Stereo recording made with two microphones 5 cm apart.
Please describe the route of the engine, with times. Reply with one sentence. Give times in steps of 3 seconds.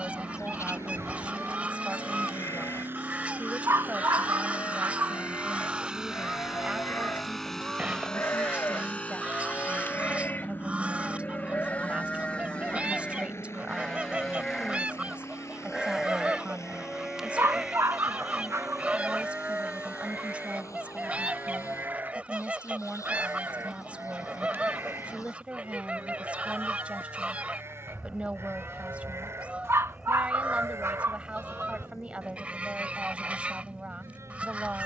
You can hear the engine on the right from 0 s, in the centre from 6 s and on the left from 9 s.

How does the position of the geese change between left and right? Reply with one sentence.
You can hear the geese stay put.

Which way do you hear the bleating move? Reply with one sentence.
You can hear the bleating travel towards the right.